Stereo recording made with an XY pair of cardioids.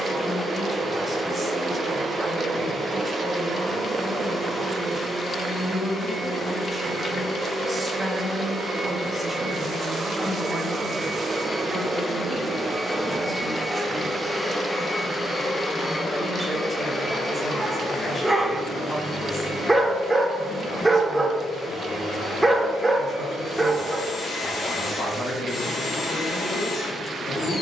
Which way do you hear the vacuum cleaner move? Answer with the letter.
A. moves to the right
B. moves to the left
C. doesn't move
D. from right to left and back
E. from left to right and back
B.